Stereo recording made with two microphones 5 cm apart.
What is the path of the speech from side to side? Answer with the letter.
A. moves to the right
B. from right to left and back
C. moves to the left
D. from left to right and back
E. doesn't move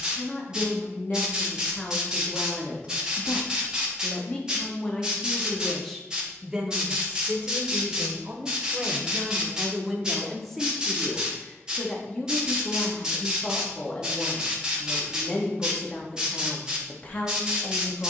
D.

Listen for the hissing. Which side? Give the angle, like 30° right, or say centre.
20° right.